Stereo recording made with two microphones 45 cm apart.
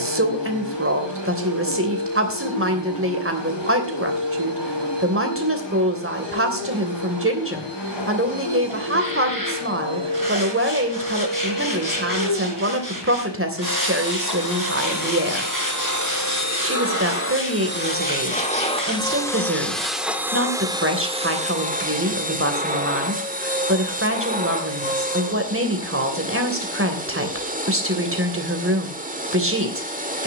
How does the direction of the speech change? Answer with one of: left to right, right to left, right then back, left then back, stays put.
stays put.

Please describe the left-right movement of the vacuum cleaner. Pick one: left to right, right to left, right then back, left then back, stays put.
left to right.